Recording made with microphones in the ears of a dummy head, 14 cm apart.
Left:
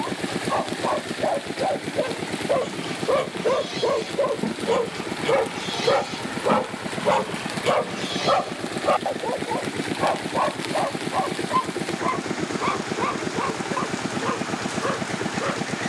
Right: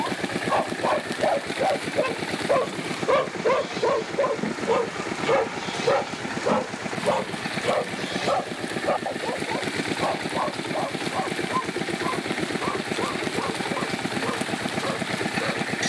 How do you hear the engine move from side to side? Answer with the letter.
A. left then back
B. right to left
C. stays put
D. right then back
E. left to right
C.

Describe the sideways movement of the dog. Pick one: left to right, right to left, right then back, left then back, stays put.
right to left.